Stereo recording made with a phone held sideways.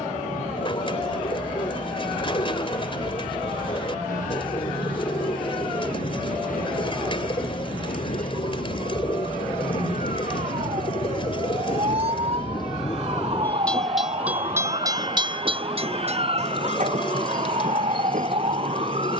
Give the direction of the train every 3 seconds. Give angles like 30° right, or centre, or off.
80° left, 80° left, 70° left, 60° left, 10° left, 50° right, 70° right.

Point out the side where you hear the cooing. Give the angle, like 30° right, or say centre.
40° left.